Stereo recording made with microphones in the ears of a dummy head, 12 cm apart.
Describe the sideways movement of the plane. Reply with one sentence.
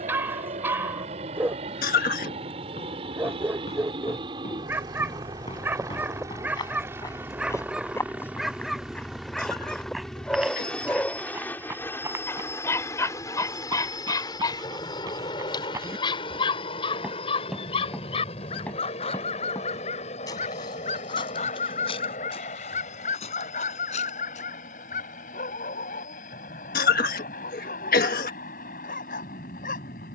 In this clip you hear the plane travel towards the left.